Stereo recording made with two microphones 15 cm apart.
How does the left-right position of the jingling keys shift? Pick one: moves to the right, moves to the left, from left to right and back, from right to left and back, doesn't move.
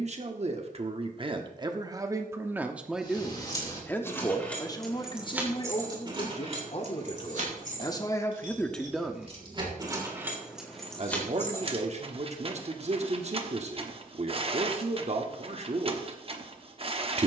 from left to right and back.